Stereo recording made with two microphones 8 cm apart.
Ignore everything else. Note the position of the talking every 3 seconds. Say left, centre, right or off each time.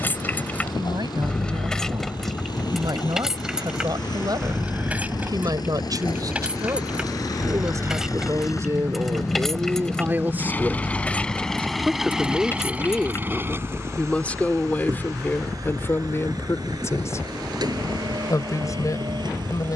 right, right, right, right, centre, left, left.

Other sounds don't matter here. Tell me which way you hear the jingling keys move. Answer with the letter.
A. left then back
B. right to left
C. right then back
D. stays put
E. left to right
C.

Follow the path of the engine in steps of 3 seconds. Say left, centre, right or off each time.
left, left, left, left, right, right, right.